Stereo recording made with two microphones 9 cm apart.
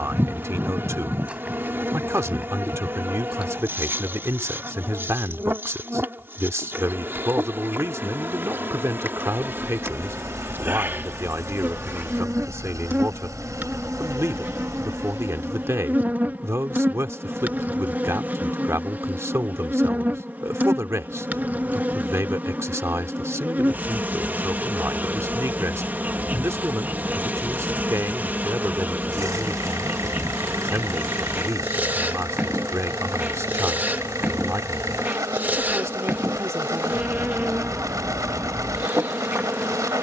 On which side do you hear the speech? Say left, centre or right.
right.